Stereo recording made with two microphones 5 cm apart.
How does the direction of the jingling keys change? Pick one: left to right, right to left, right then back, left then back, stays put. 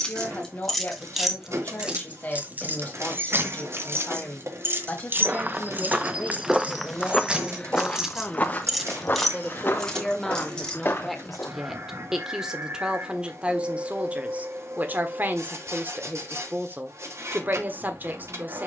right then back.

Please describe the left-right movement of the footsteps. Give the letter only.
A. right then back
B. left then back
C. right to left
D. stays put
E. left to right
C.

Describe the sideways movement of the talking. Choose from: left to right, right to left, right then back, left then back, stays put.
left to right.